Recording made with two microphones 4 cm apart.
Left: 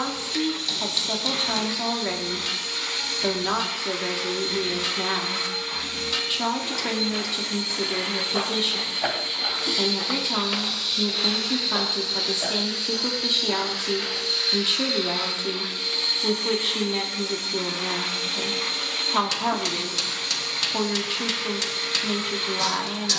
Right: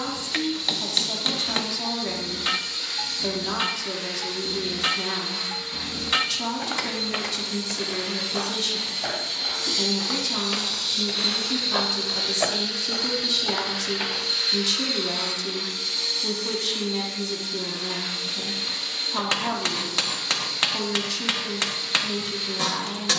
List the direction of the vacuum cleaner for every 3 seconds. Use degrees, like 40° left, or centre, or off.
60° left, 60° left, 50° left, 20° left, centre, 40° left, 60° left, 60° left.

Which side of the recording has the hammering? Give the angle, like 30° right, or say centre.
40° right.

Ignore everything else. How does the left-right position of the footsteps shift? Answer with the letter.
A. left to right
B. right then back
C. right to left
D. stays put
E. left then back
E.